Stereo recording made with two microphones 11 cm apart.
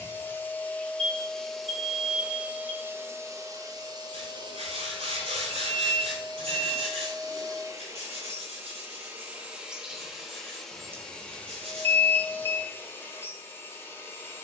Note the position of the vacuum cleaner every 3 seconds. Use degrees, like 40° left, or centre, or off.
centre, 40° right, 30° right, centre, 20° left.